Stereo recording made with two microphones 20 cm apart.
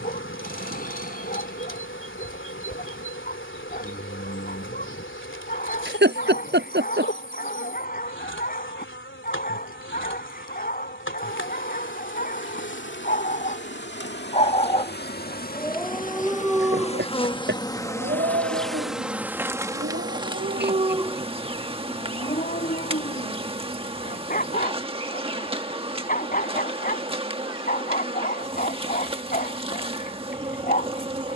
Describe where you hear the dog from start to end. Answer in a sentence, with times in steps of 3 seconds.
In this clip you hear the dog on the left from 0 s, in the centre from 15 s, on the right from 18 s and on the left from 21 s.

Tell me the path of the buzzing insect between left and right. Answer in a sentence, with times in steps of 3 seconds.
In this clip you hear the buzzing insect on the left from 0 s, in the centre from 18 s and on the right from 21 s.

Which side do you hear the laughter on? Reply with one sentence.
In this clip you hear the laughter on the right.